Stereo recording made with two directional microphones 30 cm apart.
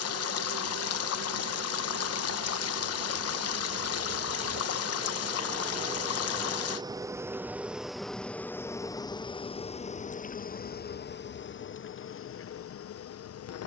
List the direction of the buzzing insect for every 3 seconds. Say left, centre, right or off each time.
right, right, centre, left, left.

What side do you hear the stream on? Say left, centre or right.
left.